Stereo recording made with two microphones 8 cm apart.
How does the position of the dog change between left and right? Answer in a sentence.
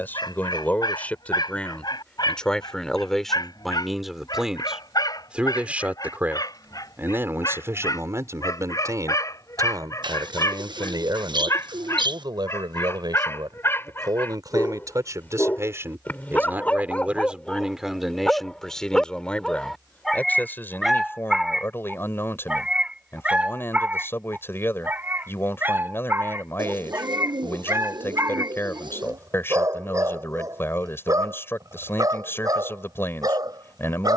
You can hear the dog go from the left side to the right.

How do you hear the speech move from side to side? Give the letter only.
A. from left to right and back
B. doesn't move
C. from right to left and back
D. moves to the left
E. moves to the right
A.